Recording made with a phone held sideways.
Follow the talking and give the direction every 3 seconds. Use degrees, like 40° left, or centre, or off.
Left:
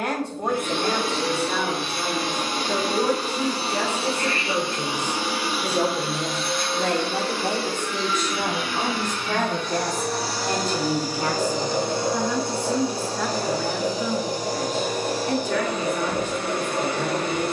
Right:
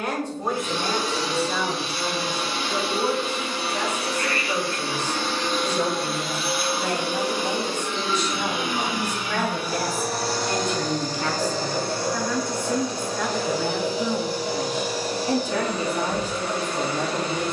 70° left, 60° left, 50° left, 30° left, centre, 30° right.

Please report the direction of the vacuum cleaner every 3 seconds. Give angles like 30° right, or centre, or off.
50° left, 20° left, 10° right, centre, 40° left, 50° left.